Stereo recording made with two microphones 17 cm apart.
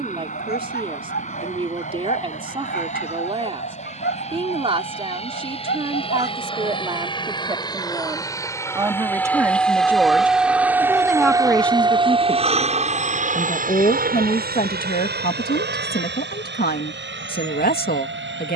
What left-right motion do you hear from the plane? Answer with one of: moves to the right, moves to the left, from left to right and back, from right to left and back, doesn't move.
moves to the right.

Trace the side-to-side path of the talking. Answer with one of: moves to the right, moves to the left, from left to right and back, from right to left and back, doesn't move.
moves to the left.